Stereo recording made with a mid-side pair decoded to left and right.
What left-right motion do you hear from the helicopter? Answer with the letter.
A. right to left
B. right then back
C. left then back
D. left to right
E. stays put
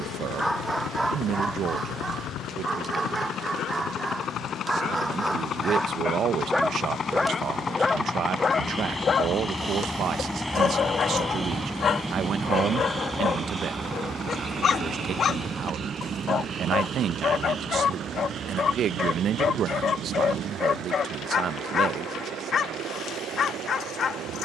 D.